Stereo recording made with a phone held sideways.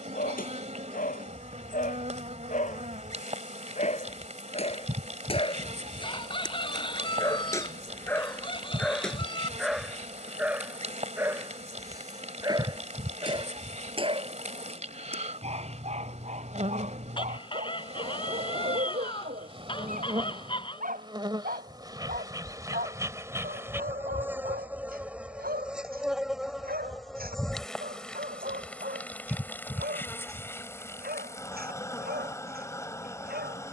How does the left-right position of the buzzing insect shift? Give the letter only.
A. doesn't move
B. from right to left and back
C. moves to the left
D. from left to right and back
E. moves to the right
C.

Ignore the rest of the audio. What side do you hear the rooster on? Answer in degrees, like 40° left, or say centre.
30° left.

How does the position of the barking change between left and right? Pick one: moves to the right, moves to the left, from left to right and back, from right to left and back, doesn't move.
moves to the right.